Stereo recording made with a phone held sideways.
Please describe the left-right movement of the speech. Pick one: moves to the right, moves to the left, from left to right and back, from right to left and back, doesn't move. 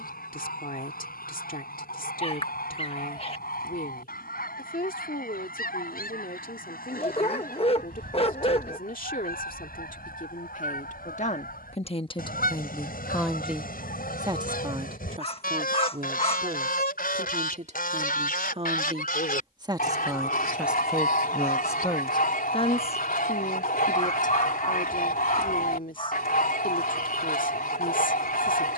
from left to right and back.